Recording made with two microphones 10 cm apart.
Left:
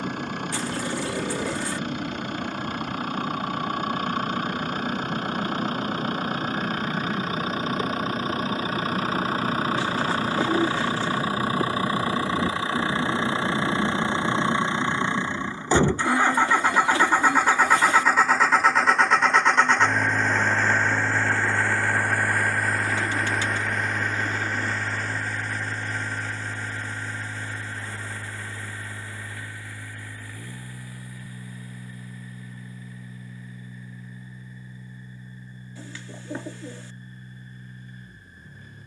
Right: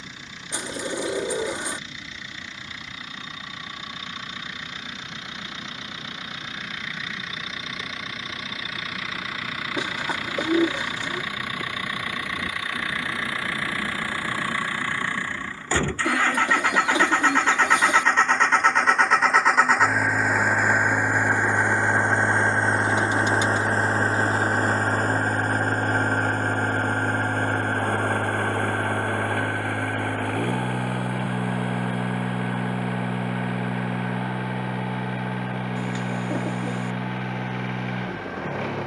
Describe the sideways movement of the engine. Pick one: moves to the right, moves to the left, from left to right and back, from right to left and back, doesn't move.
moves to the right.